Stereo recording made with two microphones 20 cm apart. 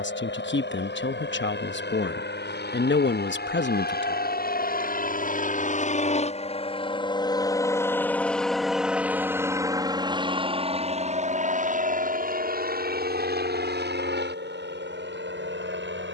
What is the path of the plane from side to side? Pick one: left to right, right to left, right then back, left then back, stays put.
left to right.